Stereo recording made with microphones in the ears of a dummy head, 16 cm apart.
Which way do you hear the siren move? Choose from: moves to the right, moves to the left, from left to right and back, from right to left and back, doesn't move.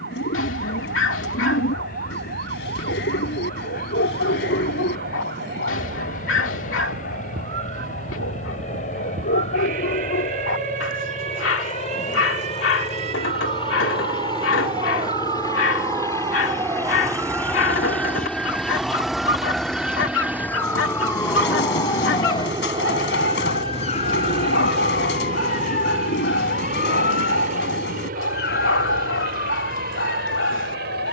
moves to the left.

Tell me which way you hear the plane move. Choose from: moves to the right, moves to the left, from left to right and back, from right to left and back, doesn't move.
moves to the right.